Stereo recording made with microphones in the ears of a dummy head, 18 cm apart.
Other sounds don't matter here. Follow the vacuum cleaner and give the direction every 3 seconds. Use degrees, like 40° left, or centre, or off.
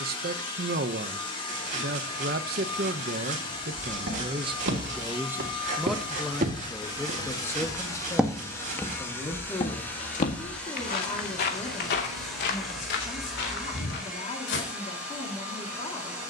30° left, 30° left, 20° left, 10° left, centre, 10° right.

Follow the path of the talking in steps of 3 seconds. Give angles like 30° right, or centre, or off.
50° right, 30° right, 10° left, 20° left, 30° left, 30° left.